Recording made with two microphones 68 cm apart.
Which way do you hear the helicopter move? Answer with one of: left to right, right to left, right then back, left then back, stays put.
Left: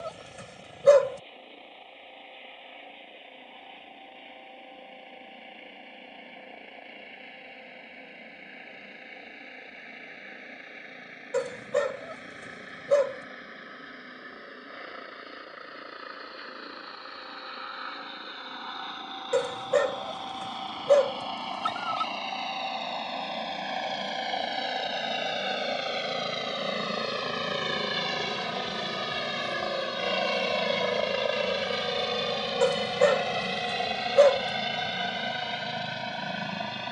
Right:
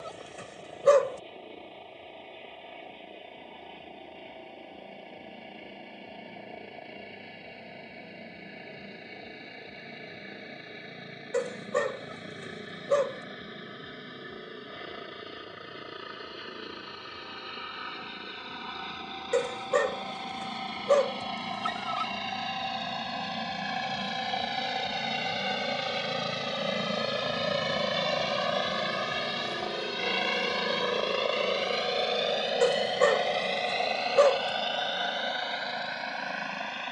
right to left.